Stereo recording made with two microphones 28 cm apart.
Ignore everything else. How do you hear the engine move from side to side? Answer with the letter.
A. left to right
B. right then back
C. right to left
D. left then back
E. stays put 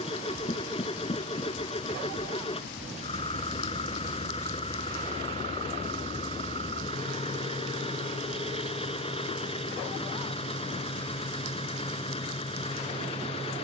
E.